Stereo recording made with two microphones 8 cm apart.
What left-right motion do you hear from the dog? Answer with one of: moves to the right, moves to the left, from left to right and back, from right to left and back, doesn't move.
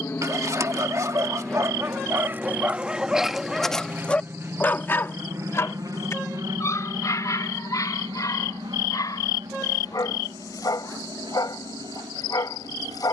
moves to the left.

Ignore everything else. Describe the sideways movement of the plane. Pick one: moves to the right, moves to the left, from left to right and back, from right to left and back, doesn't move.
moves to the right.